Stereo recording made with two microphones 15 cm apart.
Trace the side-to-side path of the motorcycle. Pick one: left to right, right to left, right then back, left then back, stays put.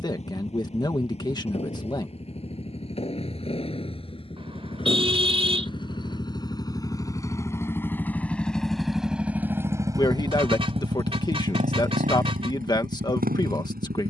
left to right.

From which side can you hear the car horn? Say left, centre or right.
right.